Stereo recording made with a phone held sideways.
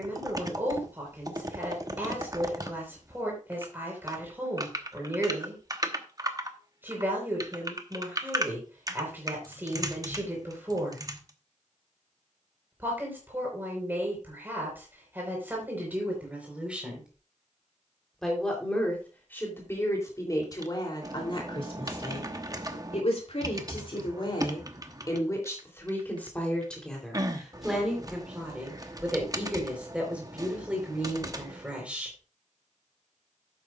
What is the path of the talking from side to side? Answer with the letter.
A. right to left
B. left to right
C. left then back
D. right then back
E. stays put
C.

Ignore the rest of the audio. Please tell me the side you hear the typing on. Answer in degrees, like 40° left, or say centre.
30° right.